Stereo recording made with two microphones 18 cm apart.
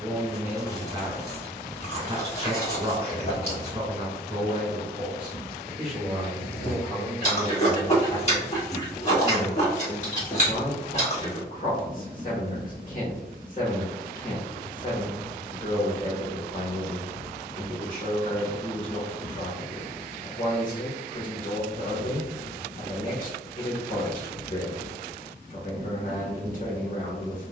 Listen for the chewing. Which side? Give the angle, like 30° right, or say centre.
40° left.